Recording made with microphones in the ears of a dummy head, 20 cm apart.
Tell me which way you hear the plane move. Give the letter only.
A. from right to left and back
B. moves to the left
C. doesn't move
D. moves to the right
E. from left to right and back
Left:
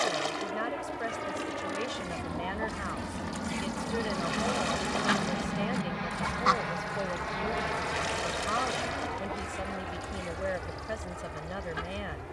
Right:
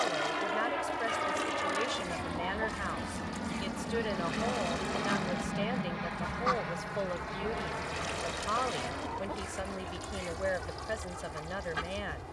B.